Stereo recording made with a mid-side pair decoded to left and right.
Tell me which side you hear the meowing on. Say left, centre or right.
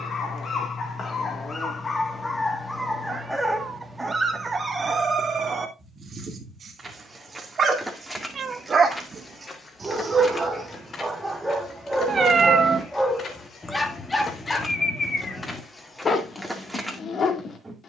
right.